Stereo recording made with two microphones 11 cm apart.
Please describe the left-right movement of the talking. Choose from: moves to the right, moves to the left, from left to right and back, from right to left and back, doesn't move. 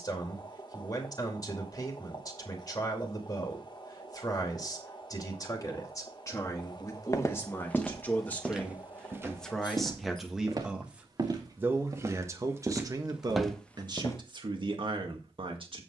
moves to the right.